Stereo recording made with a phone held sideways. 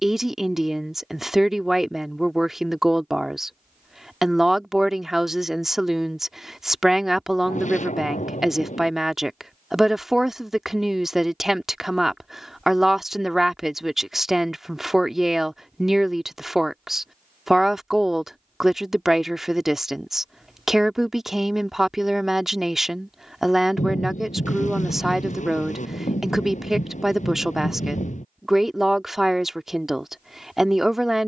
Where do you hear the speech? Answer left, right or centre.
centre.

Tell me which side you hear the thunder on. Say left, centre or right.
left.